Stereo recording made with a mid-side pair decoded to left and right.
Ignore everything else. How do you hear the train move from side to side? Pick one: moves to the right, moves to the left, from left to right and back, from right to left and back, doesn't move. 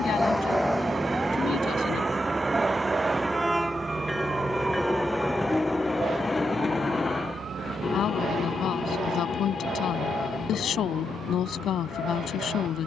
moves to the left.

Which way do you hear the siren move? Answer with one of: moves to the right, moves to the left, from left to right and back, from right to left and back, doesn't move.
moves to the right.